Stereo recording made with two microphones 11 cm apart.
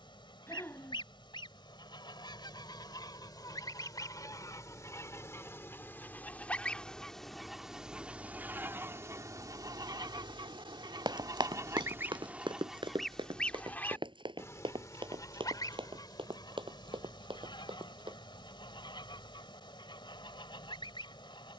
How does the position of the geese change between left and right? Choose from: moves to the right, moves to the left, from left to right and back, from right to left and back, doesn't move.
from left to right and back.